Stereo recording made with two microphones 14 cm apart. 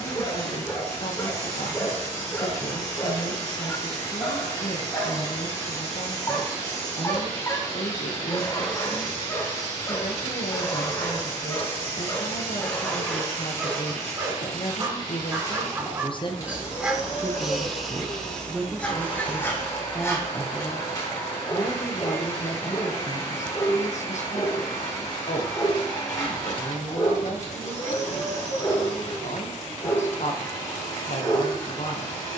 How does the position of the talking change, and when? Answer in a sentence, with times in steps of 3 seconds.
You can hear the talking on the left from 0 s, in the centre from 18 s and on the left from 21 s.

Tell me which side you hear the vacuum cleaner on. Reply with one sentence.
You can hear the vacuum cleaner on the left.